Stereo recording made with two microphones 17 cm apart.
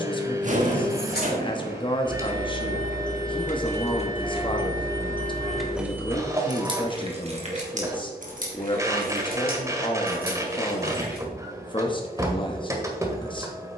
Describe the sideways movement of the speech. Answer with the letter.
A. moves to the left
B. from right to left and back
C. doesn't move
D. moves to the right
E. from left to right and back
C.